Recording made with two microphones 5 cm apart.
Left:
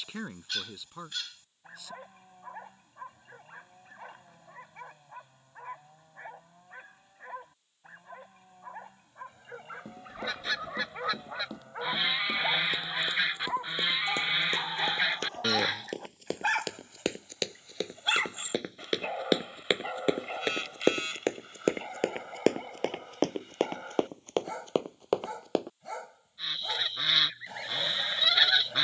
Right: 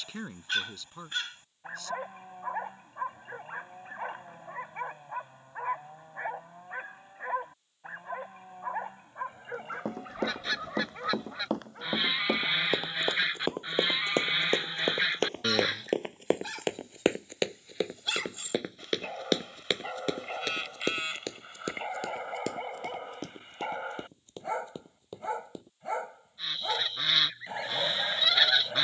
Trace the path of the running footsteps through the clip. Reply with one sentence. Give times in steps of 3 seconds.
In this clip you hear the running footsteps not at all from 0 s, on the right from 9 s, in the centre from 18 s, on the left from 21 s and not at all from 27 s.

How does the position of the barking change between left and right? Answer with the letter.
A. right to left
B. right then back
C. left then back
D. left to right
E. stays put
C.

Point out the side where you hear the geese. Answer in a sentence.
In this clip you hear the geese in the centre.